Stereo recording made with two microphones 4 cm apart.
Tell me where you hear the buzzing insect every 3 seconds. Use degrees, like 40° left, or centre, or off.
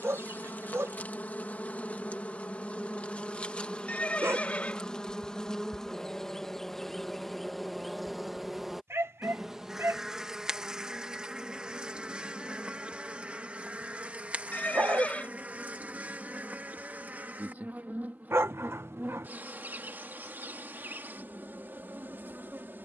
40° left, 20° left, centre, 20° right, 30° right, 40° right, 50° right, 50° right.